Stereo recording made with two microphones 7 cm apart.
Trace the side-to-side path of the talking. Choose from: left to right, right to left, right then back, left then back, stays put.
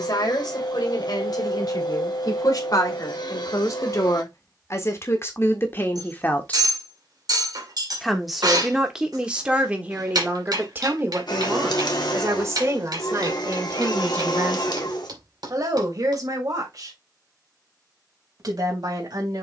left to right.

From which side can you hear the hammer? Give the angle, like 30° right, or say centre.
60° right.